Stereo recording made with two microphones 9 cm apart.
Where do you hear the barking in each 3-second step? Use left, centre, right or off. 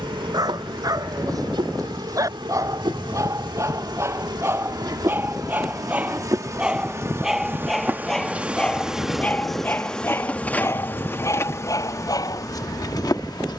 right, right, centre, left, left.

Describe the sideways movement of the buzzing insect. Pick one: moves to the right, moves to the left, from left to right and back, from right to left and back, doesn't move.
moves to the left.